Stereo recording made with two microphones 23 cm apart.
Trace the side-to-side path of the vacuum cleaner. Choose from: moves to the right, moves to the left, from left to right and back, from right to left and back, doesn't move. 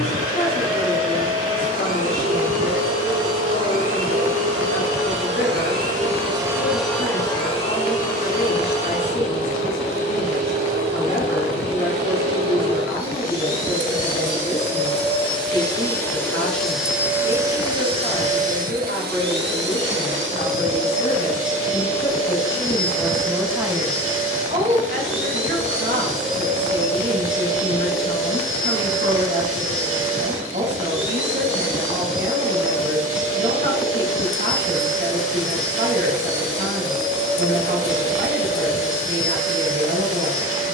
from right to left and back.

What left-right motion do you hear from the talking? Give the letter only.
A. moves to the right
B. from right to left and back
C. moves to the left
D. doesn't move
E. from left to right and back
A.